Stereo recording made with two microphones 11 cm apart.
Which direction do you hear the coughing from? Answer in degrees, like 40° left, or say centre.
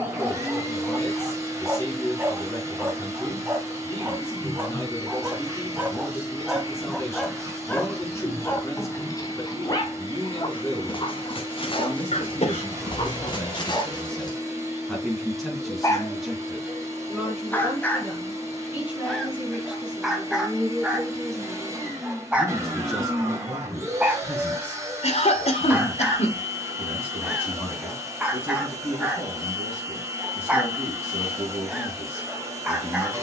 80° left.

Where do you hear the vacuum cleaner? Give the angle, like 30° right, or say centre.
30° right.